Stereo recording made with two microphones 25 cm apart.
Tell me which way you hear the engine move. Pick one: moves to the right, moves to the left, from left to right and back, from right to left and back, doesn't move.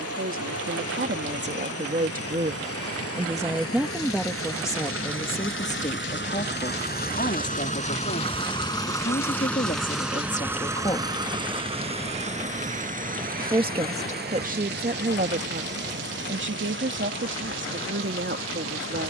moves to the right.